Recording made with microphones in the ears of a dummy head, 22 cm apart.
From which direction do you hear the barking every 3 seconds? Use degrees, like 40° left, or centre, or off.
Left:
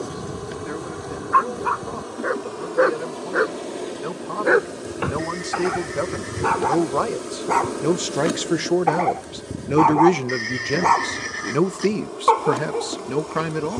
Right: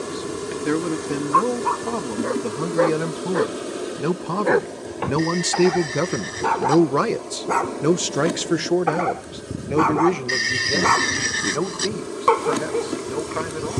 20° left, 10° left, centre, 20° right, 30° right.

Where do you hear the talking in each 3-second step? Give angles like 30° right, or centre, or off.
70° right, 60° right, 20° right, 20° left, 50° left.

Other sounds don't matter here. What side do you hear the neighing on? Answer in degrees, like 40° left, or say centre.
50° right.